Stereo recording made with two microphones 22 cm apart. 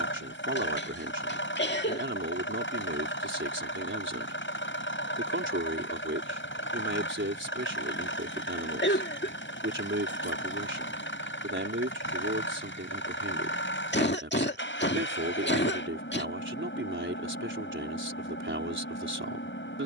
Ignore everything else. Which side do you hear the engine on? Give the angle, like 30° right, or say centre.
60° left.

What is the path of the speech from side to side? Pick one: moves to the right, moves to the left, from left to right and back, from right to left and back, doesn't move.
doesn't move.